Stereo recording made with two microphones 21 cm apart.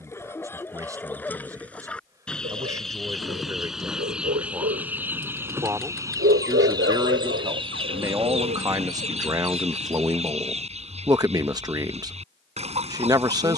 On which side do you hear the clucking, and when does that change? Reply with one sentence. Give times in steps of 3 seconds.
You can hear the clucking in the centre from 0 s and on the right from 6 s.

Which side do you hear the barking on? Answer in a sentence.
You can hear the barking on the right.